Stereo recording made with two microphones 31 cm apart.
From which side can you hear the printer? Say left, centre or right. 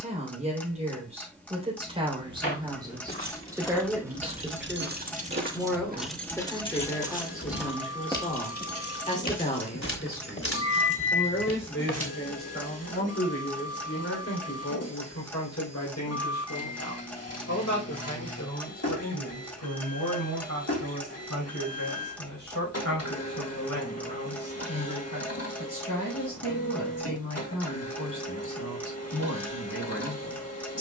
left.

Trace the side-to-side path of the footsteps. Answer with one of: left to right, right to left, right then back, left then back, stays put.
right then back.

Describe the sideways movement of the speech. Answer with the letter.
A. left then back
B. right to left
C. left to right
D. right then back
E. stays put
B.